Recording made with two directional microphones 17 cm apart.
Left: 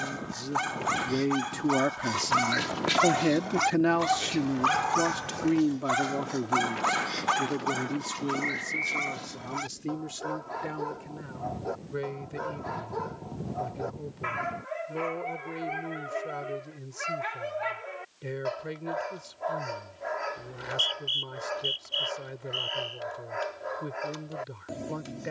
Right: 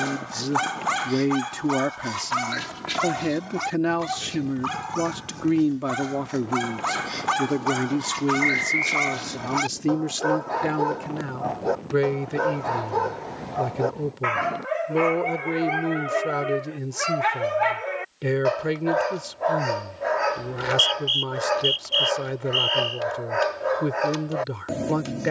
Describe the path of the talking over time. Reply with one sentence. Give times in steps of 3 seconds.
You can hear the talking on the right from 0 s, in the centre from 3 s and on the right from 6 s.